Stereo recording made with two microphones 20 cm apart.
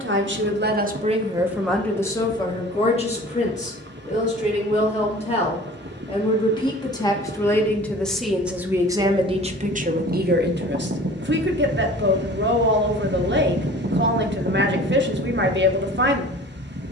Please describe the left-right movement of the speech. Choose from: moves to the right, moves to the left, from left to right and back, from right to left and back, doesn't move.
from right to left and back.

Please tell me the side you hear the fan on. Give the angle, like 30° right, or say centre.
60° right.